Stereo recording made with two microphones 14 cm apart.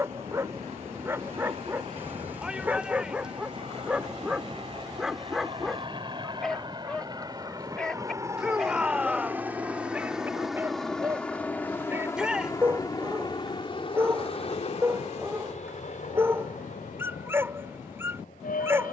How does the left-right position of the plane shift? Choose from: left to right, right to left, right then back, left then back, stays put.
right to left.